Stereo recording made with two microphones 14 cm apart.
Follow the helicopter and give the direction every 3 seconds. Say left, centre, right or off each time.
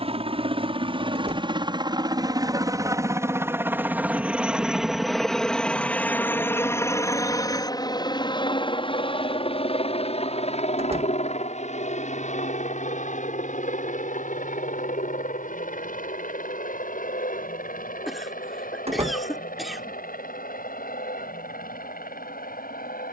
right, centre, left, left, left, left, left, left.